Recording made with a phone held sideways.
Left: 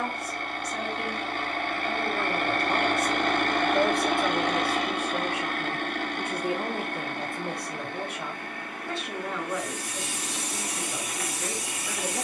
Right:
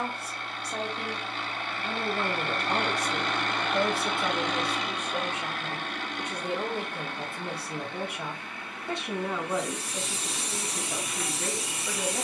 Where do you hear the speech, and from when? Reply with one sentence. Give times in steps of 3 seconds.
You can hear the speech on the right from 0 s, in the centre from 3 s and on the right from 9 s.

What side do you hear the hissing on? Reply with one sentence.
You can hear the hissing on the right.